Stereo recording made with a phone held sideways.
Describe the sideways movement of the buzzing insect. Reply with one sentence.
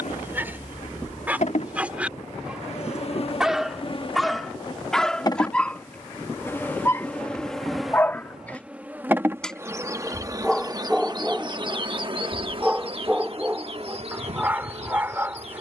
In this clip you hear the buzzing insect move to the right.